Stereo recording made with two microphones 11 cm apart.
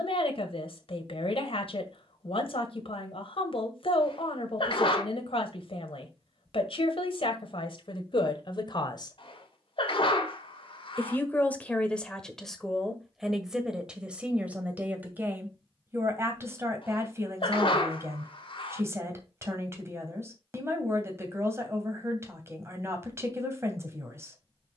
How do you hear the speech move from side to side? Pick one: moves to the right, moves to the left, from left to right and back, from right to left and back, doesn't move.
moves to the right.